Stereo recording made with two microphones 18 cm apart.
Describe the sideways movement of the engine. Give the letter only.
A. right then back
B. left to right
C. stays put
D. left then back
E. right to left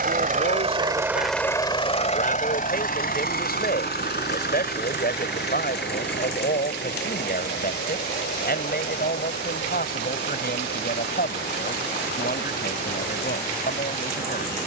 E.